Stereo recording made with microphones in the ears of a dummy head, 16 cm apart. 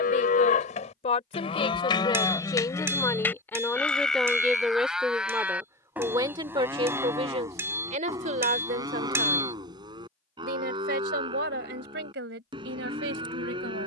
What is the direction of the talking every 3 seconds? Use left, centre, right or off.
left, centre, right, right, right.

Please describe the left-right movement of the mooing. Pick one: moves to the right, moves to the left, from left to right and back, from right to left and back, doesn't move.
moves to the right.